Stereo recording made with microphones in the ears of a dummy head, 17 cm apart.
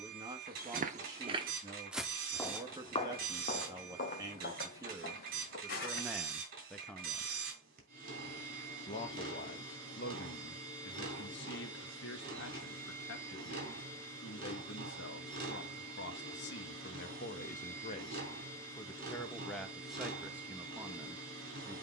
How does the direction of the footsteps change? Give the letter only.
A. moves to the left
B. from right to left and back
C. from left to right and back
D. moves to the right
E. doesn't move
A.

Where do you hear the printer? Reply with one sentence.
In this clip you hear the printer on the right.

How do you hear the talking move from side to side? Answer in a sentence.
You can hear the talking go left and come back.